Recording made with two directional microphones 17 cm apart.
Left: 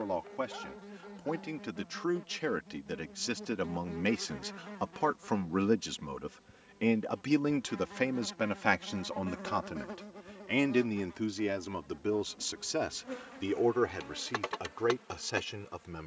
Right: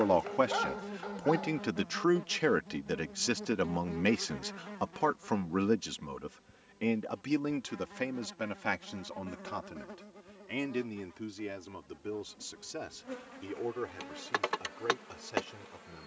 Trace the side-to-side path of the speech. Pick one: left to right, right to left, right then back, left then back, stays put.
right to left.